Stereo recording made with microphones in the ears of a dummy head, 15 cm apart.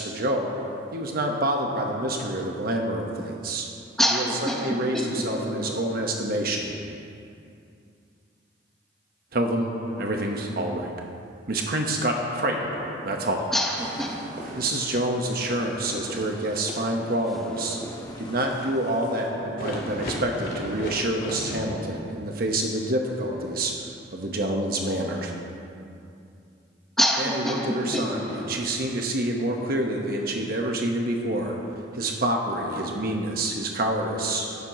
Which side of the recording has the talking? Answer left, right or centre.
right.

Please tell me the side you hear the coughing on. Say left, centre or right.
centre.